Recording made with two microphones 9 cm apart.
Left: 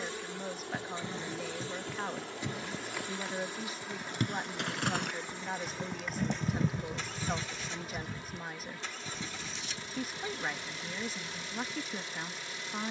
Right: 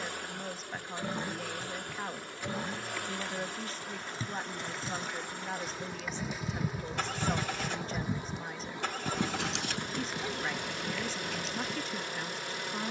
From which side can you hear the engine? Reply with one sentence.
In this clip you hear the engine on the right.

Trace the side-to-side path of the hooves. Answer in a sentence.
In this clip you hear the hooves travel towards the right.